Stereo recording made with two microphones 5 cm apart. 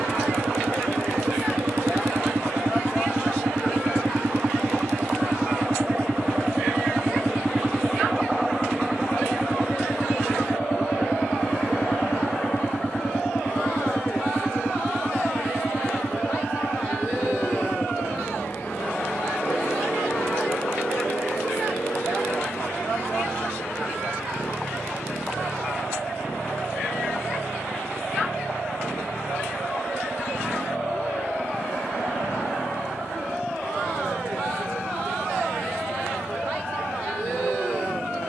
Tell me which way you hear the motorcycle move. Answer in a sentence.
You can hear the motorcycle go from the right side to the left.